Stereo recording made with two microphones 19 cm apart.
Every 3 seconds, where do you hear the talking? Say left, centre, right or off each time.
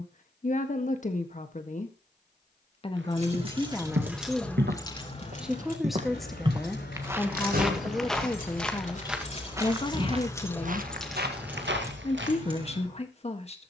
left, centre, centre, left, left.